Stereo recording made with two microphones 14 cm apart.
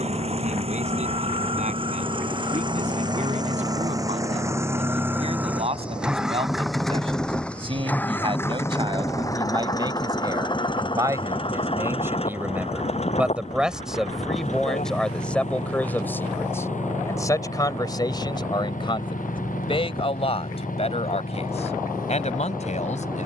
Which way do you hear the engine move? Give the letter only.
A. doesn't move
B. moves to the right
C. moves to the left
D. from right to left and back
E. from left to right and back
C.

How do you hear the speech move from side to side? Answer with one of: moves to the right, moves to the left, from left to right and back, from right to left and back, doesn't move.
moves to the left.